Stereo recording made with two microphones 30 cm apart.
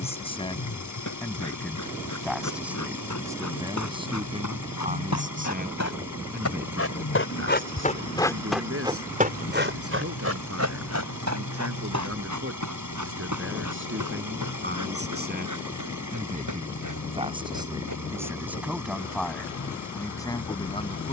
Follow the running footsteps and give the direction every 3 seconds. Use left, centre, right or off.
left, left, left, right, right, right, right.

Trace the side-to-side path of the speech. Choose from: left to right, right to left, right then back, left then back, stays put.
right then back.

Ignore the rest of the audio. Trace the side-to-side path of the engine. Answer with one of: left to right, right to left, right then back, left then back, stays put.
stays put.